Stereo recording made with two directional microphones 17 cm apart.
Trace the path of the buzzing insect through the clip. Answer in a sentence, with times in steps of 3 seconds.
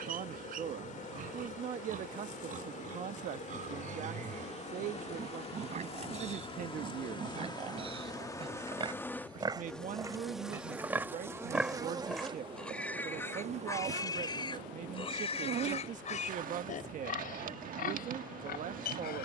You can hear the buzzing insect on the left from 0 s, in the centre from 9 s and on the right from 12 s.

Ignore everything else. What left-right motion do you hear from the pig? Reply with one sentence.
In this clip you hear the pig travel towards the left.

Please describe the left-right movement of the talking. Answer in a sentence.
In this clip you hear the talking stay put.